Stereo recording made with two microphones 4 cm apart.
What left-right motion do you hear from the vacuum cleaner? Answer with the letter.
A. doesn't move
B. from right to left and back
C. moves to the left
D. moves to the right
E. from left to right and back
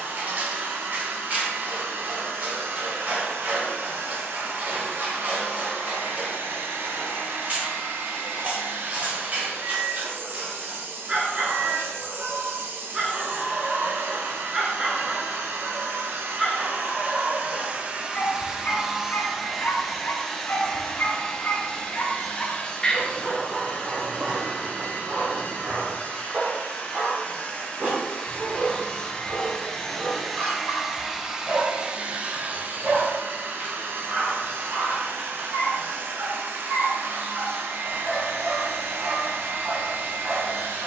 B.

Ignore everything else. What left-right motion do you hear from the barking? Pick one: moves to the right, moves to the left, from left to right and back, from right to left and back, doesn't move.
from right to left and back.